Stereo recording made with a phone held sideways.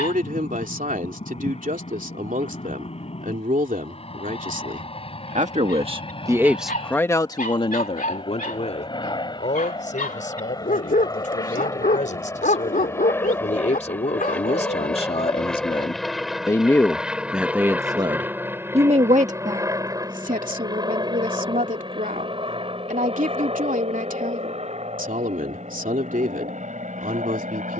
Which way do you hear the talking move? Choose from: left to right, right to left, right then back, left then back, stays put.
left then back.